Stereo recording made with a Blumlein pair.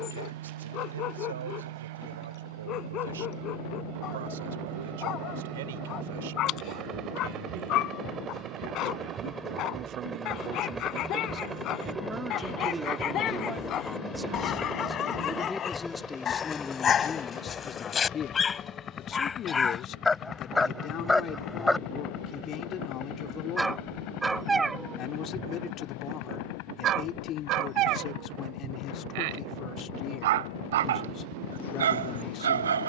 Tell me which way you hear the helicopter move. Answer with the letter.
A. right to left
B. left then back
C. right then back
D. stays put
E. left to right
A.